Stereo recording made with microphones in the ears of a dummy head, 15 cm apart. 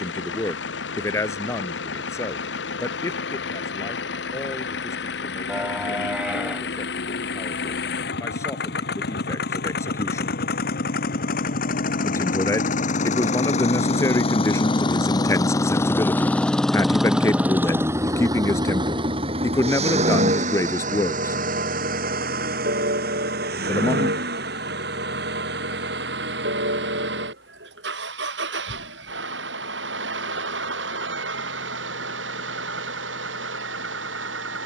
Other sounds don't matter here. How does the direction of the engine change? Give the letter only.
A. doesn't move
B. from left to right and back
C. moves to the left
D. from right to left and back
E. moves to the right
E.